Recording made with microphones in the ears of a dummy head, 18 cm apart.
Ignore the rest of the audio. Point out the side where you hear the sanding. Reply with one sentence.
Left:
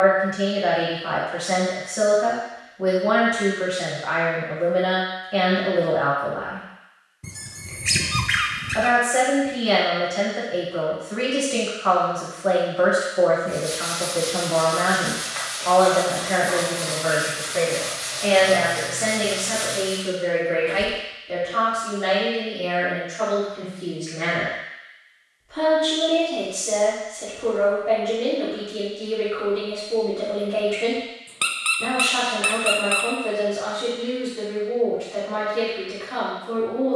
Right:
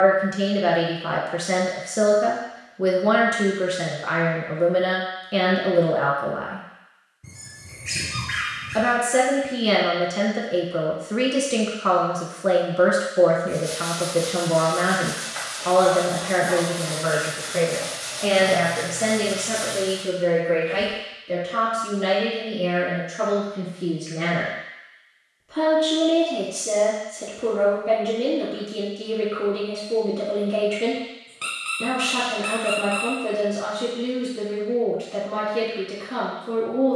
In this clip you hear the sanding in the centre.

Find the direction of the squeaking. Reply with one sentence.
You can hear the squeaking on the left.